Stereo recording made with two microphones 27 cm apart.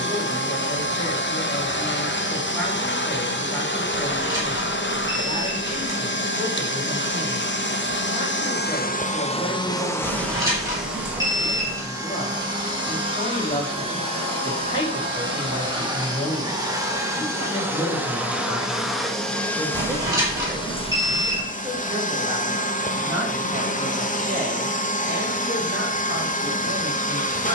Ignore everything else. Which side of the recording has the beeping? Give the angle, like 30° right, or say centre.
10° right.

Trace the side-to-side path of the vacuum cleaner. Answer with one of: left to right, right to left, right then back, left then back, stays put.
right then back.